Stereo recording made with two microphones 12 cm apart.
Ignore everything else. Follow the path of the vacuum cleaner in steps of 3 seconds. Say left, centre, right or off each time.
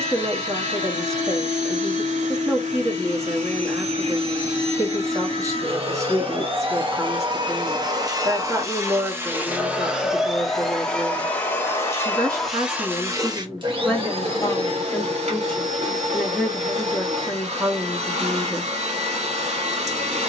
right, right, right, centre, right, right, right.